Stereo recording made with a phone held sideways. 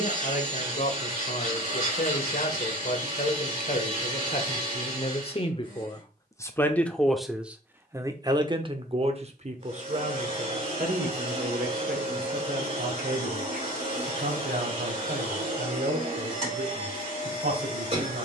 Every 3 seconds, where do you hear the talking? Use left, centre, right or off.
left, left, centre, right, right, right.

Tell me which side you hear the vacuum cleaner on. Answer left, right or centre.
right.